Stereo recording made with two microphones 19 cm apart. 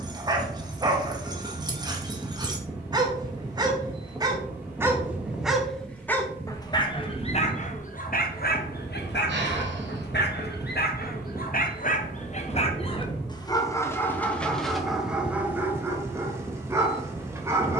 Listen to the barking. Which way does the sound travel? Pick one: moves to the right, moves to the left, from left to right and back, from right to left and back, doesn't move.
from right to left and back.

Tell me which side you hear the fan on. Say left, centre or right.
centre.